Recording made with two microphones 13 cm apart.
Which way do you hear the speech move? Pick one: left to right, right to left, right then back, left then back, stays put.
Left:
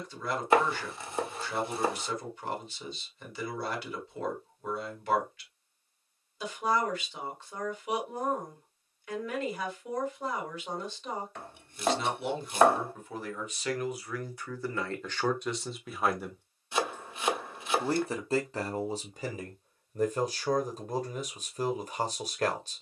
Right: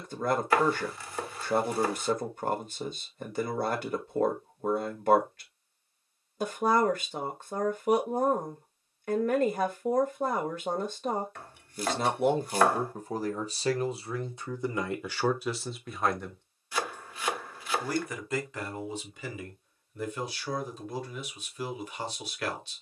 right to left.